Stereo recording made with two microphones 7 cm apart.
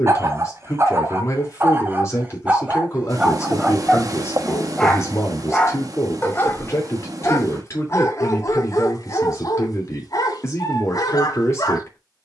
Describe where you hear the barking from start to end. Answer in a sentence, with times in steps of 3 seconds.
You can hear the barking on the right from 0 s, in the centre from 3 s and on the left from 6 s.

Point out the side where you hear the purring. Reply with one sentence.
In this clip you hear the purring on the right.